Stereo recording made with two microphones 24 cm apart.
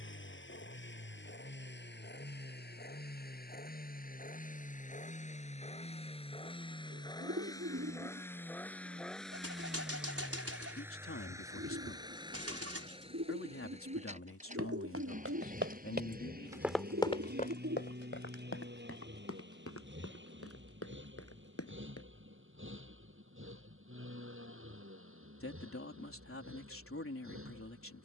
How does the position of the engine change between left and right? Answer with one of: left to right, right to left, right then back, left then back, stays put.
left to right.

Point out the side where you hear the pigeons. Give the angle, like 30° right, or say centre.
70° right.